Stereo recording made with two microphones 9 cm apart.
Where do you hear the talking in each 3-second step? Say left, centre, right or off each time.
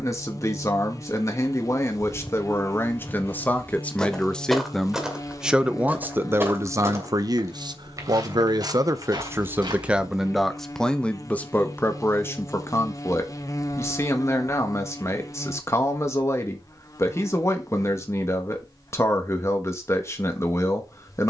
left, centre, right, centre, left, left, left.